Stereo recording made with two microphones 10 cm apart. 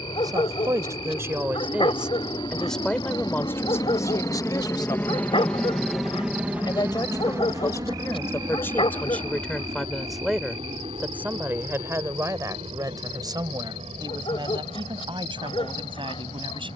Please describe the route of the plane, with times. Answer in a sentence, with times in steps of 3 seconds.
You can hear the plane on the left from 0 s and on the right from 6 s.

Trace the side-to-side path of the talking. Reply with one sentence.
You can hear the talking move from right to left and back again.